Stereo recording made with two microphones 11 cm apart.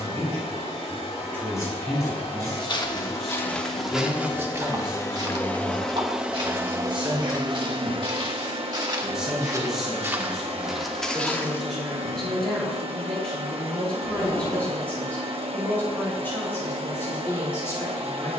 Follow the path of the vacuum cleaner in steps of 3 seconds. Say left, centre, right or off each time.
left, left, right, right, right, right.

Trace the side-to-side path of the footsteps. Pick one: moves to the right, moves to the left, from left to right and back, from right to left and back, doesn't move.
from left to right and back.